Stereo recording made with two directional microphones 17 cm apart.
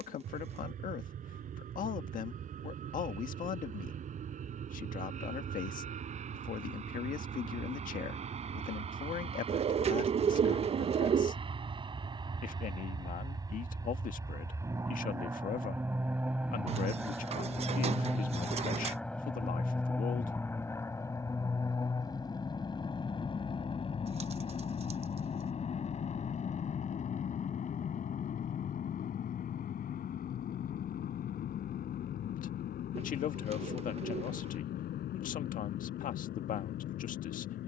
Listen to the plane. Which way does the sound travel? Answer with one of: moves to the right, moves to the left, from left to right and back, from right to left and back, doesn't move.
moves to the left.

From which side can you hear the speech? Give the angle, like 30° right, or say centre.
50° left.